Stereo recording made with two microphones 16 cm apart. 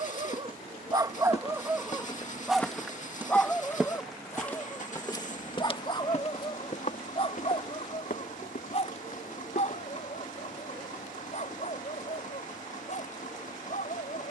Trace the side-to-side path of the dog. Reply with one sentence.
You can hear the dog go from the right side to the left.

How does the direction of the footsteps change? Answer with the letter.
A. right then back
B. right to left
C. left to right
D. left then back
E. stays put
A.